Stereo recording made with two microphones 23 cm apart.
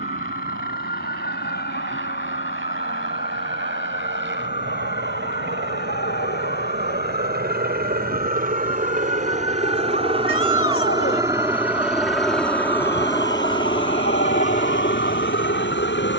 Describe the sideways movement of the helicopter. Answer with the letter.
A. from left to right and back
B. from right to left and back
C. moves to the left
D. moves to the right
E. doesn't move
C.